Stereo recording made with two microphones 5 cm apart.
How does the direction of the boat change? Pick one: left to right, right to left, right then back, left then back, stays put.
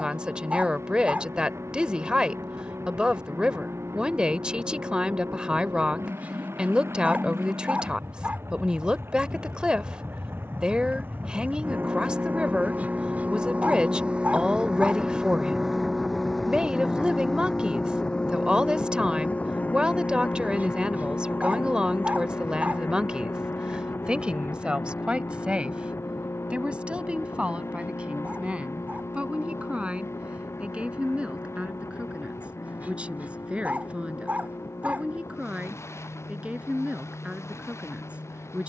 right to left.